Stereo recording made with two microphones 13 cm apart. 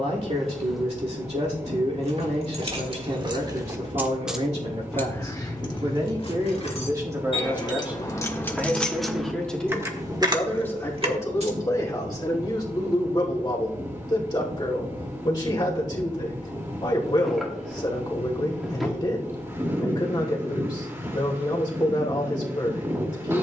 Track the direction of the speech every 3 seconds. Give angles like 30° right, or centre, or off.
60° right, 50° right, 20° right, 20° left, 30° left, 30° left, 30° left, 30° left.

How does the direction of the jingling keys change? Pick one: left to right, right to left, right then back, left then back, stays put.
left then back.